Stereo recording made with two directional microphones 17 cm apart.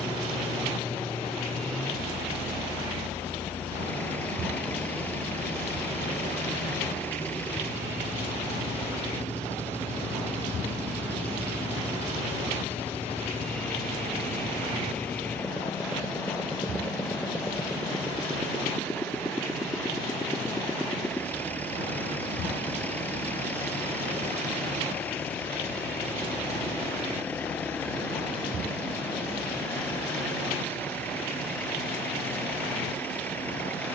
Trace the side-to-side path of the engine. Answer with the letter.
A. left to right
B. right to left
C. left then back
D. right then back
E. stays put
E.